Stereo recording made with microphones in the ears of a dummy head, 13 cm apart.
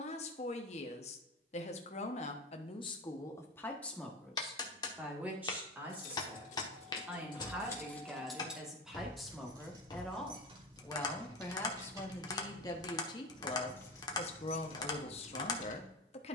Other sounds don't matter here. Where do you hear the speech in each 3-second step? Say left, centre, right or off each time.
left, centre, centre, centre, left, left.